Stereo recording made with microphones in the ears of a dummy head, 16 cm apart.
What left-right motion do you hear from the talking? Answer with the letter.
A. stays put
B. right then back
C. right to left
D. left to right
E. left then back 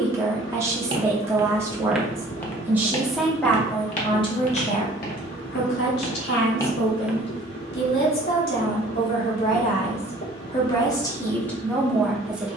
E.